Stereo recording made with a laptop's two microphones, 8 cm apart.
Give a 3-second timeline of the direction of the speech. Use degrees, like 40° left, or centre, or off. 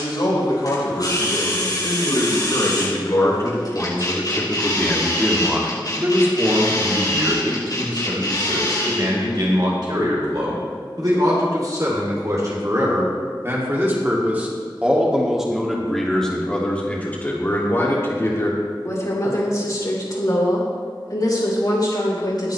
60° left, 20° left, 50° right, 50° right, 30° right, 10° left, 40° left, 50° left.